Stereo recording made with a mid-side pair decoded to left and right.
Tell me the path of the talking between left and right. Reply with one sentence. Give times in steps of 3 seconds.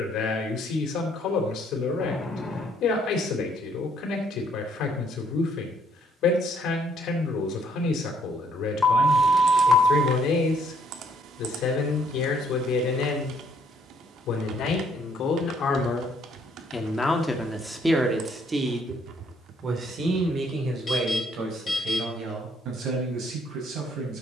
In this clip you hear the talking on the left from 0 s and on the right from 18 s.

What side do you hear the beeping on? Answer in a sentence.
In this clip you hear the beeping on the left.